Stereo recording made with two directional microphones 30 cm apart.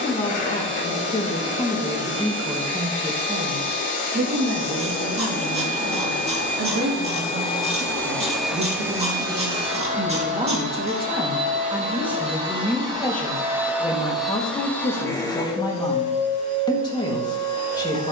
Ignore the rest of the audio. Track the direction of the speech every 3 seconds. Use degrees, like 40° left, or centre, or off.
10° left, 40° right, 40° right, 20° right, 10° left, 10° left.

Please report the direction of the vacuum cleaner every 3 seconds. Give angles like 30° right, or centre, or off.
40° left, 40° left, 20° left, 20° right, 10° right, 20° left.